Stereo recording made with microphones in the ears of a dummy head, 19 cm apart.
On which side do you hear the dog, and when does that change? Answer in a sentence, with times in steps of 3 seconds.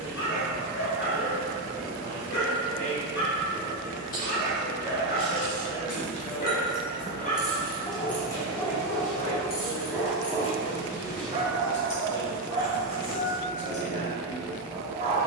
In this clip you hear the dog on the left from 0 s, in the centre from 9 s and on the right from 12 s.